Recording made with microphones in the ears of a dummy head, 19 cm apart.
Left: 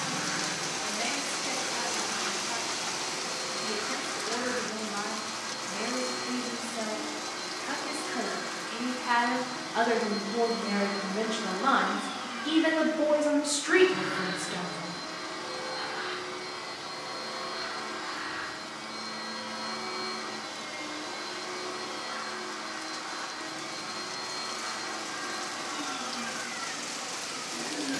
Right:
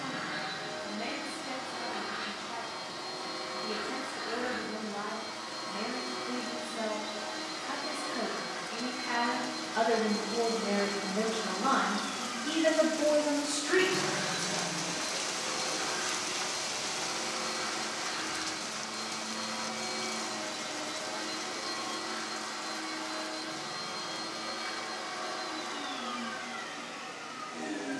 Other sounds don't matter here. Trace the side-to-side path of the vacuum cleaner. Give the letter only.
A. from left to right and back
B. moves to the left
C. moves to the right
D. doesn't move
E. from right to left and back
E.